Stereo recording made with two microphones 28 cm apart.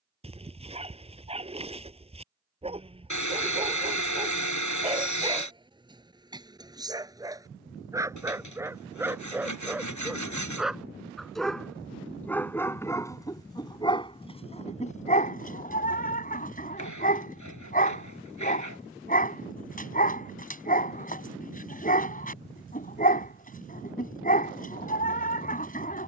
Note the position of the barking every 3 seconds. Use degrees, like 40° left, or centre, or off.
20° right, 20° right, 10° right, centre, 10° left, 30° left, 30° left, 30° left, 30° left.